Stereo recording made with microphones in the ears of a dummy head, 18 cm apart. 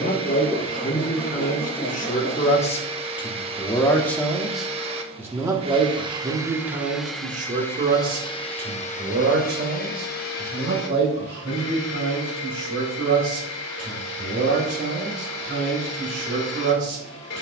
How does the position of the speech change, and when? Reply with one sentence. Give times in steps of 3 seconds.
In this clip you hear the speech on the left from 0 s, in the centre from 3 s and on the right from 6 s.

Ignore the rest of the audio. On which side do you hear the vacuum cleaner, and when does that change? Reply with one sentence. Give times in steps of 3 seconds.
You can hear the vacuum cleaner on the right from 0 s, in the centre from 6 s and on the left from 9 s.